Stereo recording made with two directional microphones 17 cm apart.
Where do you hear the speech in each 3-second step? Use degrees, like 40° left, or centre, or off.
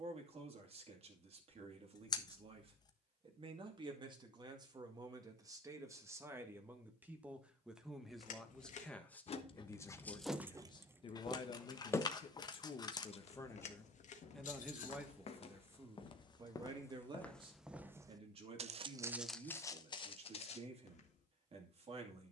40° right, 20° right, 10° right, 20° left, 20° left, 20° right, 40° right, 40° right.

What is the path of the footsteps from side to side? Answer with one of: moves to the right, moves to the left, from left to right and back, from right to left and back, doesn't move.
from left to right and back.